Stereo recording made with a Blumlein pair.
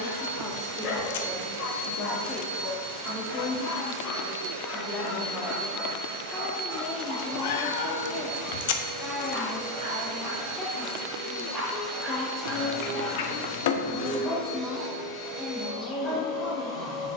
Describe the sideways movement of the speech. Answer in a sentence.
You can hear the speech stay put.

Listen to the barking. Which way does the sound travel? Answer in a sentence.
In this clip you hear the barking move from left to right and back again.